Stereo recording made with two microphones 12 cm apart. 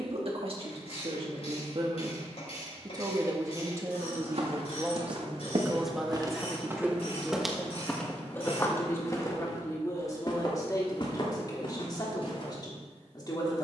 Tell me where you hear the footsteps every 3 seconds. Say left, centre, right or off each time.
off, right, centre, left, left.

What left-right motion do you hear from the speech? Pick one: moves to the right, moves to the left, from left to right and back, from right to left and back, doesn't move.
moves to the left.